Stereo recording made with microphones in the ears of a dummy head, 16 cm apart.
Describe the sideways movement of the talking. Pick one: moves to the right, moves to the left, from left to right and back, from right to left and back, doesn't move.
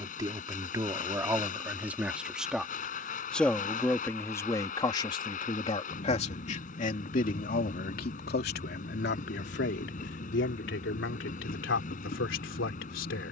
moves to the left.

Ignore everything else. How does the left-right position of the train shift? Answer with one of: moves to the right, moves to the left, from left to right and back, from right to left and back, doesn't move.
doesn't move.